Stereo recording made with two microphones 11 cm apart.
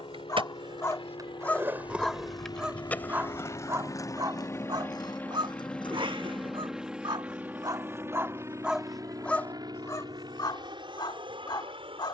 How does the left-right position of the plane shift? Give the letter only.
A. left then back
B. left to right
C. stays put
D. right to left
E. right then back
B.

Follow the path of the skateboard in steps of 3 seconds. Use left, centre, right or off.
right, left, left, off.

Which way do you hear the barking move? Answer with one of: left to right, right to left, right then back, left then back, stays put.
right then back.